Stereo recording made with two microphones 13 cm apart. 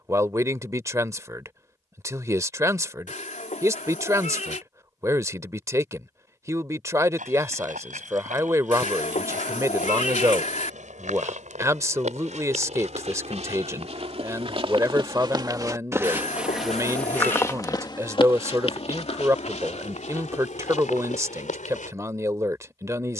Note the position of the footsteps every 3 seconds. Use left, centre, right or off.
off, off, right, right, right, centre, left, left.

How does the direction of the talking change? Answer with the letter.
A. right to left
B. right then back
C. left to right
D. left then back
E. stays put
E.